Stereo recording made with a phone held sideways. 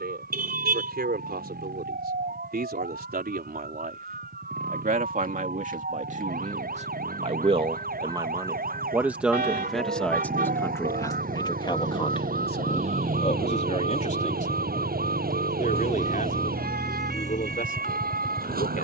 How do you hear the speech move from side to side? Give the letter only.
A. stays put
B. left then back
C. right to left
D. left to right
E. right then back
C.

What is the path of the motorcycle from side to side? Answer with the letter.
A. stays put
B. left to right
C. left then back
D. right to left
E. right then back
D.